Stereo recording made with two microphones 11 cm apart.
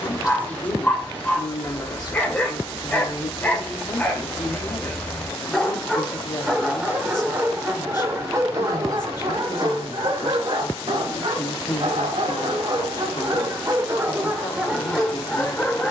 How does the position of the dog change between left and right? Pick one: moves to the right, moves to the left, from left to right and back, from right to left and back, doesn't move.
from left to right and back.